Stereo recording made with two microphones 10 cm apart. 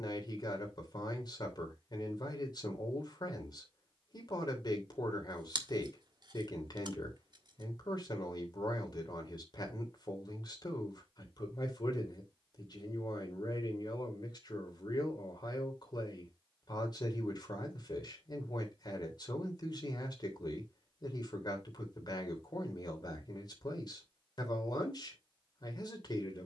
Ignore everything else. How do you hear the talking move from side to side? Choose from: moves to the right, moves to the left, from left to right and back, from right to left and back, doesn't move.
doesn't move.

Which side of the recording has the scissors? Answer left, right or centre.
right.